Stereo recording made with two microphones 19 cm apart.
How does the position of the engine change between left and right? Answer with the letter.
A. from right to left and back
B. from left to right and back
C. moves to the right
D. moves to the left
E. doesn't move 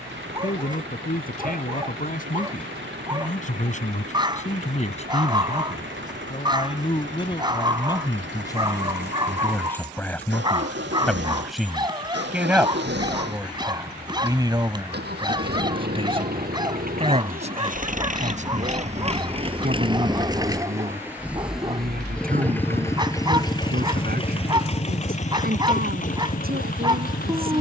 D.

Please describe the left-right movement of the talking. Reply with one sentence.
In this clip you hear the talking go from the left side to the right.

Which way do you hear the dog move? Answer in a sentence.
In this clip you hear the dog stay in one place.